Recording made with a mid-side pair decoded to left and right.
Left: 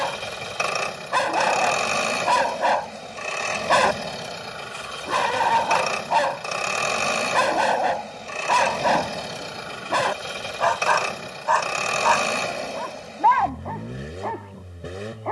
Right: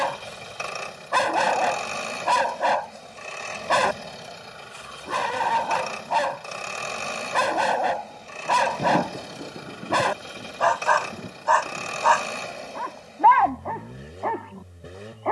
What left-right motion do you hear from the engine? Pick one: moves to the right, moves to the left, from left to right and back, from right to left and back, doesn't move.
doesn't move.